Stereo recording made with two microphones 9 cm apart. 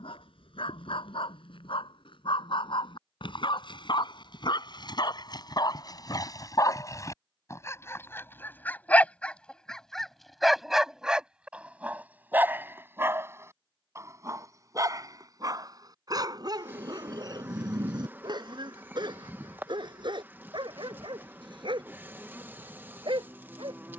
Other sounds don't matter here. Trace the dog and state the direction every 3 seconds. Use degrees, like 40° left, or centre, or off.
70° left, 50° left, 30° left, centre, 30° right, 40° right, 50° right, 60° right.